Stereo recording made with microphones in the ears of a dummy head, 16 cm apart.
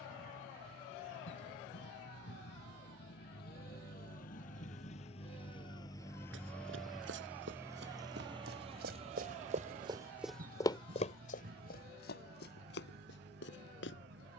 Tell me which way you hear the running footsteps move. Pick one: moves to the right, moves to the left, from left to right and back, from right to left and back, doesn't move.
moves to the left.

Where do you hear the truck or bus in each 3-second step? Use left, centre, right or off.
left, left, centre, right, right.